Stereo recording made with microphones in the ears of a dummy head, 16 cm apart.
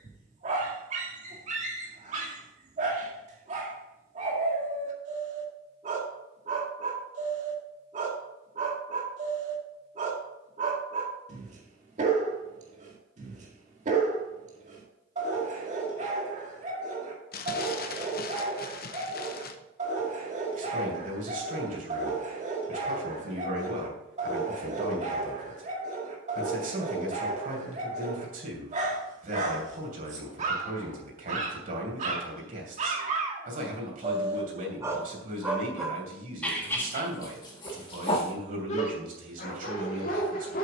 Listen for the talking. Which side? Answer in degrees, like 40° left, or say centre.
50° right.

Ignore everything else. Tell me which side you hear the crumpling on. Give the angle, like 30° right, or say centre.
50° left.